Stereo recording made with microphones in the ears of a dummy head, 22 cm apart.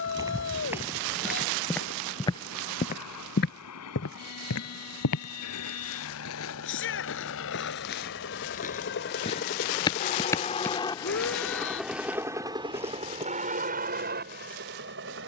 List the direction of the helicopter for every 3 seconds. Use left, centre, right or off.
left, left, left, left, right.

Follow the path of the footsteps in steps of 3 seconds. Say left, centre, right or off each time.
centre, left, left, centre, centre.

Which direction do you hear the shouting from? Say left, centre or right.
left.